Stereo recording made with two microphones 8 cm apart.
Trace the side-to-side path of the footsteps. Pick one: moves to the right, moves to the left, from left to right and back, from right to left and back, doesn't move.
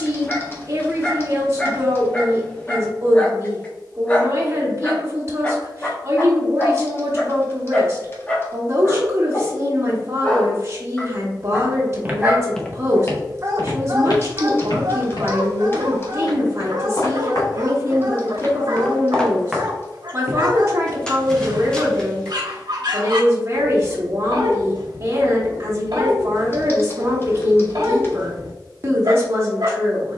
from right to left and back.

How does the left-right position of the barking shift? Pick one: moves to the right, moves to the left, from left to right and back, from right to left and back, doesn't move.
moves to the right.